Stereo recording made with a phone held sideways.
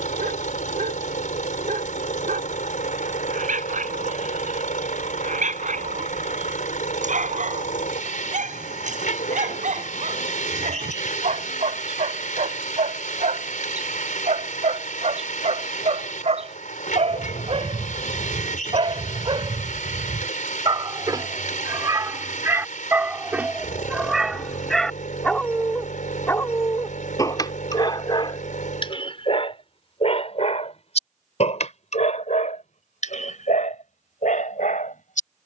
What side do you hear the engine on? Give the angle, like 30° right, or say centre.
70° left.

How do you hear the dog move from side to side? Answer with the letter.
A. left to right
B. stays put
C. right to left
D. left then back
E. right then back
C.